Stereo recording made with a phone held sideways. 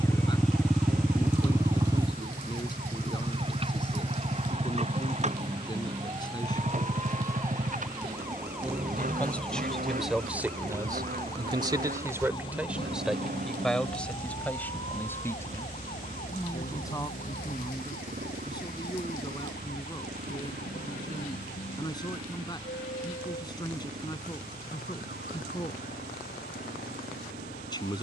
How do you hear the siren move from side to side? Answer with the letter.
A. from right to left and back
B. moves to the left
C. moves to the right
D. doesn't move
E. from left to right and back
B.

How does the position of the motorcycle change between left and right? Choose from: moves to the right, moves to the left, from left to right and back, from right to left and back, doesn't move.
moves to the right.